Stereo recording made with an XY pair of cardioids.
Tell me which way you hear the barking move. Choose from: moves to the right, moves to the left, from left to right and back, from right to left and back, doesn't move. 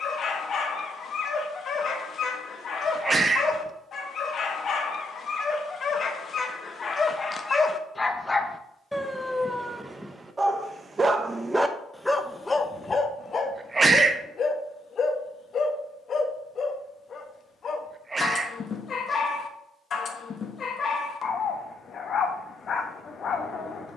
from left to right and back.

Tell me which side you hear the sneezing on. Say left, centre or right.
right.